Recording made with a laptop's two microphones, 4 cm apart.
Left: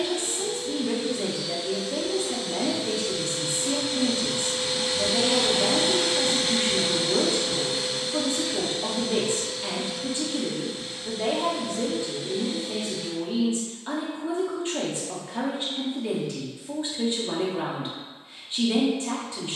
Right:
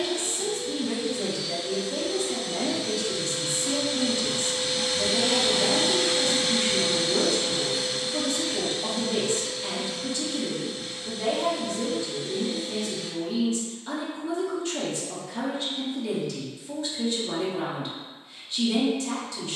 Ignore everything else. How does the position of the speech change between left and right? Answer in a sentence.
In this clip you hear the speech stay in one place.